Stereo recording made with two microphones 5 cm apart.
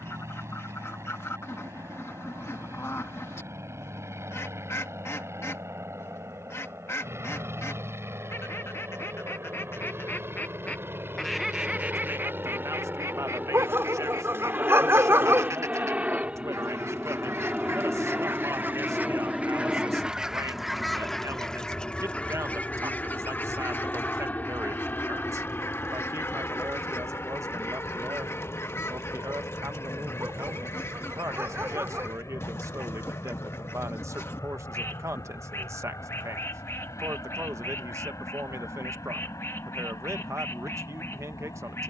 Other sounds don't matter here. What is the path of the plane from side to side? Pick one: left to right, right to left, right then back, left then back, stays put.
right to left.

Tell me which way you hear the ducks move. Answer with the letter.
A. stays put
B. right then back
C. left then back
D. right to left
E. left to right
B.